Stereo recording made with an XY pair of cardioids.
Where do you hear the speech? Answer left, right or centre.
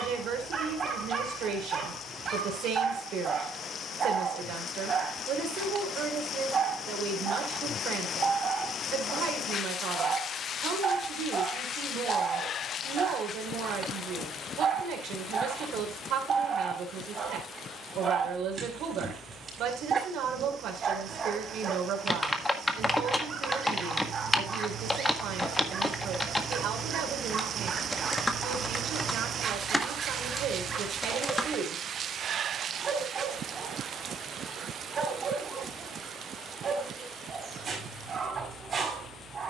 right.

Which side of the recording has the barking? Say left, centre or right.
right.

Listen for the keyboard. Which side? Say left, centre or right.
centre.